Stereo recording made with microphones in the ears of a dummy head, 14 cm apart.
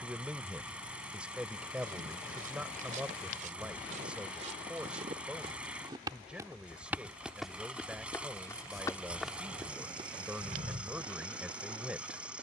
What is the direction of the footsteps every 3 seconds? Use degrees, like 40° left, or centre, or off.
60° right, 50° right, 10° left, 30° right.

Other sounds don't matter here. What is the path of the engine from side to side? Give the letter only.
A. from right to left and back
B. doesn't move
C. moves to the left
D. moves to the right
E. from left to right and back
B.